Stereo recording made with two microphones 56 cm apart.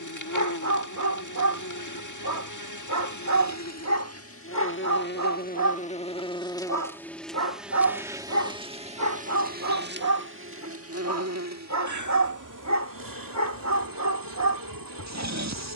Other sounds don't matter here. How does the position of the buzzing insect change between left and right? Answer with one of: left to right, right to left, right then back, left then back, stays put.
left to right.